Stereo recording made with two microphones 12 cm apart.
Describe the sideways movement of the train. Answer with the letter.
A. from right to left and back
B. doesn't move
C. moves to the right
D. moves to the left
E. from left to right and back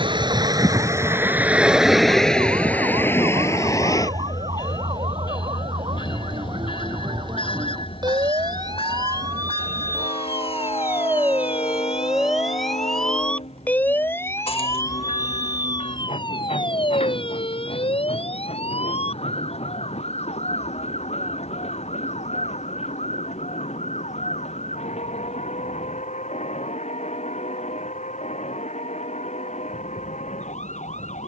D.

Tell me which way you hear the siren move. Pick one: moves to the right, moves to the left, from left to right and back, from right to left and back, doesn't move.
moves to the left.